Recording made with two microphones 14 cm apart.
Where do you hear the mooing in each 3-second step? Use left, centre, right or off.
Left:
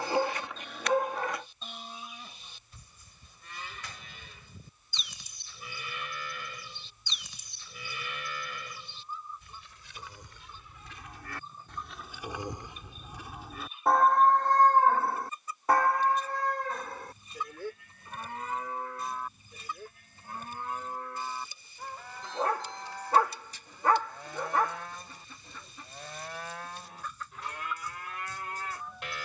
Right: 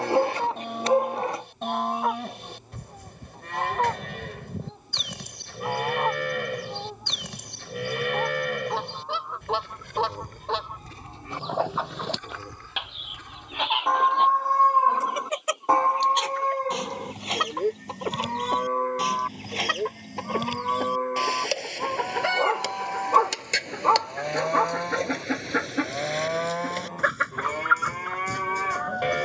right, right, right, right, centre, right, right, right, right, right.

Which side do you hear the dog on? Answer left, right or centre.
right.